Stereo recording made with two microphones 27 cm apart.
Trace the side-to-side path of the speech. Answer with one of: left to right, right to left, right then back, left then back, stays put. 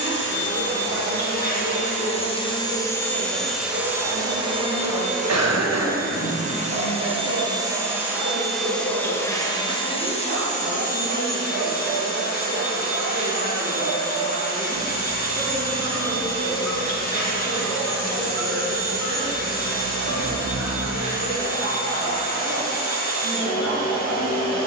stays put.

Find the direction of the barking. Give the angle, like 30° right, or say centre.
50° right.